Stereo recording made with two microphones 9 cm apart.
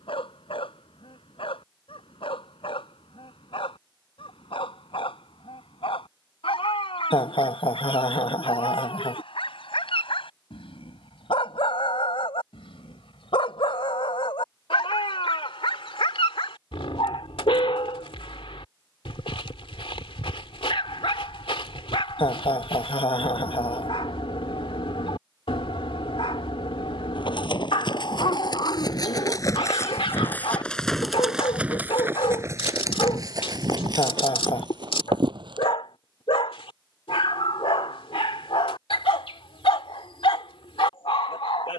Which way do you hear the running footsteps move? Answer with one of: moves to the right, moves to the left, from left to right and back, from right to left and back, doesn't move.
moves to the right.